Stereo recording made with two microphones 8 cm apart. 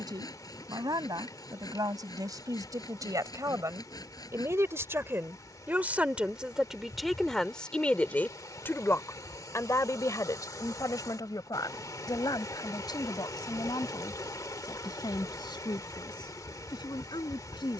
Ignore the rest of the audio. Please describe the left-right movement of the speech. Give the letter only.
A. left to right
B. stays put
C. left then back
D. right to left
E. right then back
D.